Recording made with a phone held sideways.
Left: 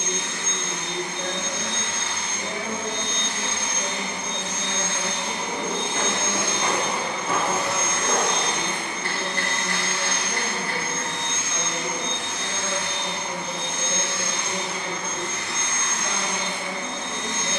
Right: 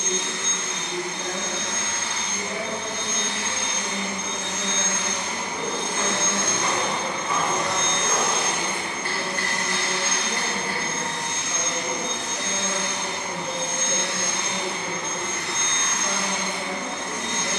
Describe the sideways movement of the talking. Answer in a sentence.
In this clip you hear the talking go from the left side to the right.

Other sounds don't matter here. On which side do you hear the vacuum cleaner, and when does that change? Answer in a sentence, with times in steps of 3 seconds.
In this clip you hear the vacuum cleaner on the left from 0 s, in the centre from 6 s and on the right from 9 s.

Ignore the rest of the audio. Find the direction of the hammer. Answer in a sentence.
In this clip you hear the hammer on the left.